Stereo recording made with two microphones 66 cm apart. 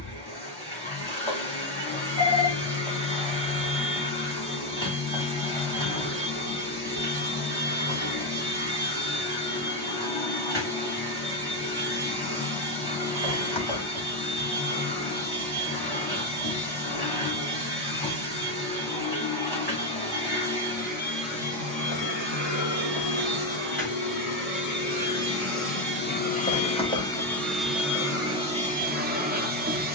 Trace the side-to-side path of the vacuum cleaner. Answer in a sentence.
In this clip you hear the vacuum cleaner move to the right.